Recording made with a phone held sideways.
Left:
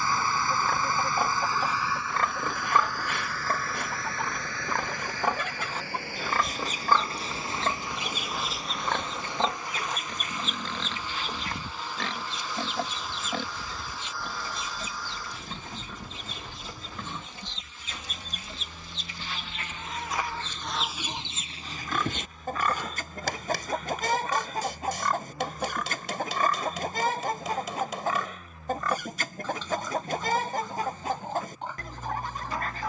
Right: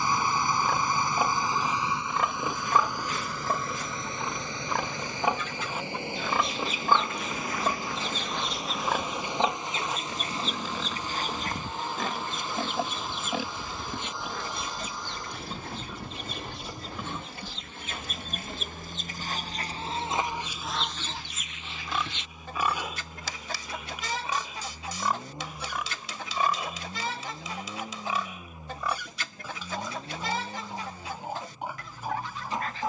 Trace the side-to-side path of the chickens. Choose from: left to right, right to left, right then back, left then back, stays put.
right then back.